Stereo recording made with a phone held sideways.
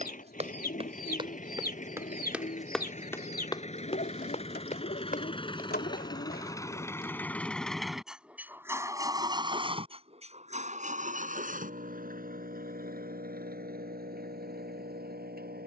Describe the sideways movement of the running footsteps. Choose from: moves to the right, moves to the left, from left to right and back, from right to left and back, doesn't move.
moves to the left.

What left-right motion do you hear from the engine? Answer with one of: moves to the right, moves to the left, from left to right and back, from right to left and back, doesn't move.
moves to the right.